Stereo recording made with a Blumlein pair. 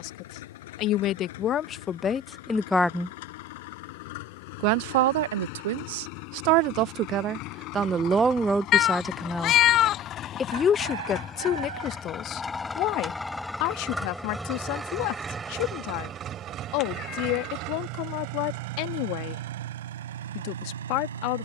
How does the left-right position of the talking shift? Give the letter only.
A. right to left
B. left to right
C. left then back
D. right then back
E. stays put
D.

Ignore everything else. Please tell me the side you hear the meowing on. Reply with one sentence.
You can hear the meowing on the left.